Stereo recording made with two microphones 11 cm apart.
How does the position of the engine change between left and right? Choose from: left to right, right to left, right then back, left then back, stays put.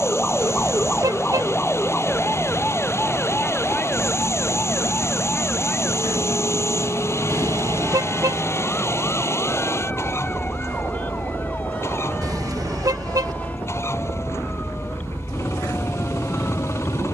stays put.